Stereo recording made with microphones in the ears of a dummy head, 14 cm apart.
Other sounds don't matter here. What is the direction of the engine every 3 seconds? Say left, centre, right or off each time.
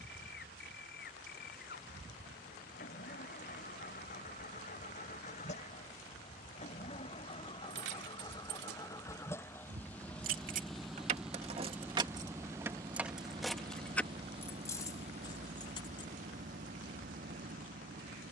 left, left, left, centre, right, right.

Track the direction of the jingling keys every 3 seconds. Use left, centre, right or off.
off, off, right, right, centre, left.